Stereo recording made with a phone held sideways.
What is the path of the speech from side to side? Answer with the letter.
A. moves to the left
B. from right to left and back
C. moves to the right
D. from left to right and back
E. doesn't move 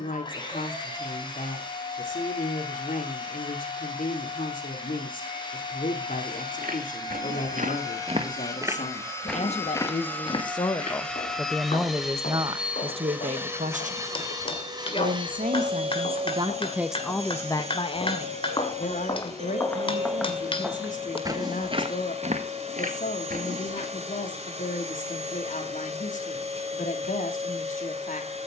D.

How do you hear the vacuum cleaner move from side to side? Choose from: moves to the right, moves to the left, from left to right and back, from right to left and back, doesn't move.
moves to the right.